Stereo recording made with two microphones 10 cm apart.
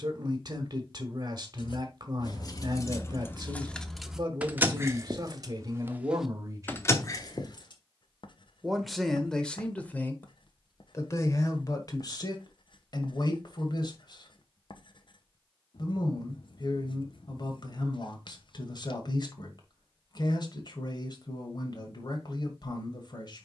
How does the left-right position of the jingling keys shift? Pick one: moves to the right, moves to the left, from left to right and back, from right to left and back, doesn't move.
from left to right and back.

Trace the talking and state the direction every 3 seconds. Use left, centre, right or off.
right, right, right, left, left, left, left, left.